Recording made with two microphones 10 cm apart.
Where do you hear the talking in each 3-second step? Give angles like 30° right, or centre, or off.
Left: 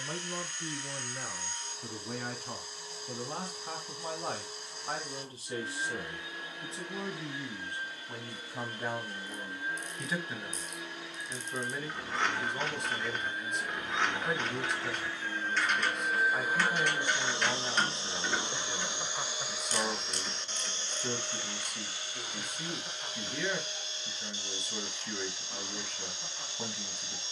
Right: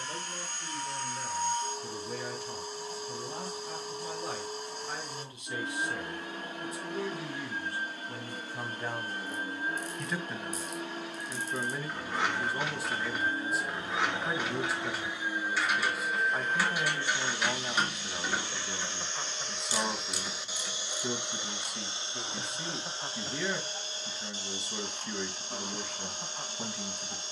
50° left, 40° left, 20° left, centre, 10° right, 10° right, 10° right, 10° right, 10° right.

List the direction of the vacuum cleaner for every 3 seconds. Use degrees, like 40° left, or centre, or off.
50° right, 50° right, 50° right, 50° right, 30° right, 10° left, 10° left, 30° right, 40° right.